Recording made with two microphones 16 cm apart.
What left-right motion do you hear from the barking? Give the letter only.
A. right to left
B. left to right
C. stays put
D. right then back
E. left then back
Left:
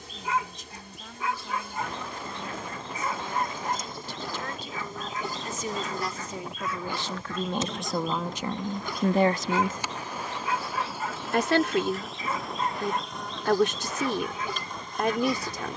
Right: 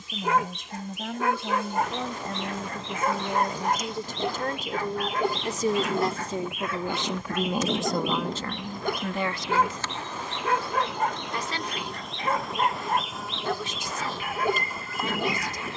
C.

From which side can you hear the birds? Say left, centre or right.
right.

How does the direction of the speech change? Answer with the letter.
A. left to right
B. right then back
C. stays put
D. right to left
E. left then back
D.